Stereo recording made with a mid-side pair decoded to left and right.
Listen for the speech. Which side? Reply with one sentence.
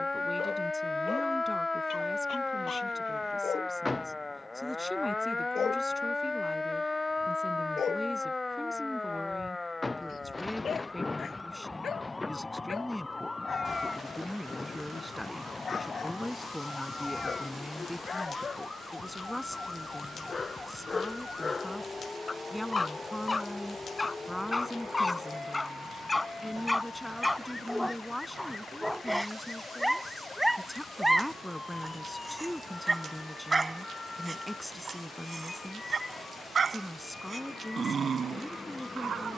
In this clip you hear the speech in the centre.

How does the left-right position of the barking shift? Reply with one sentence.
You can hear the barking move to the right.